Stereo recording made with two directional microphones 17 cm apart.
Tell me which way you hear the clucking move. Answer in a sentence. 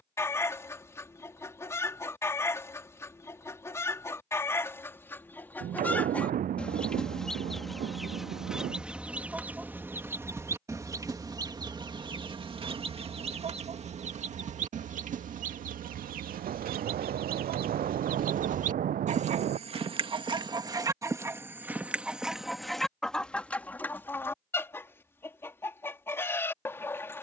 You can hear the clucking move from left to right and back again.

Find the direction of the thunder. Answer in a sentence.
You can hear the thunder on the right.